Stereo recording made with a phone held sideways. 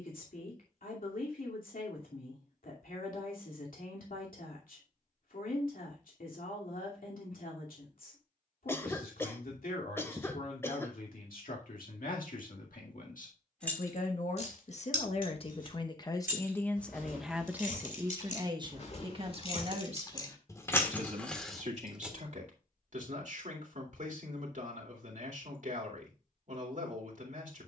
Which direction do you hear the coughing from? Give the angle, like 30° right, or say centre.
20° left.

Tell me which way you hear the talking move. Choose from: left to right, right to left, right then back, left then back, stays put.
left to right.